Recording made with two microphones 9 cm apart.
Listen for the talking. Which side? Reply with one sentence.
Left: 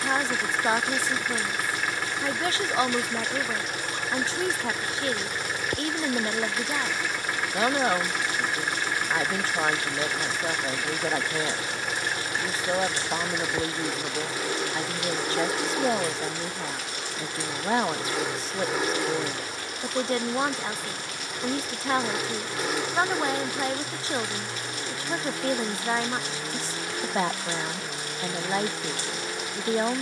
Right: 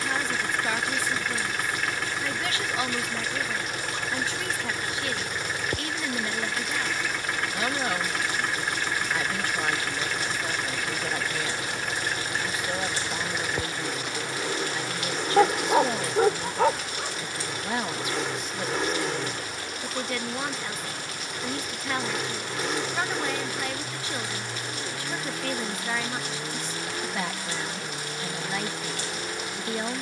In this clip you hear the talking on the left.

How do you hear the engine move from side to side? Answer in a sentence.
You can hear the engine stay put.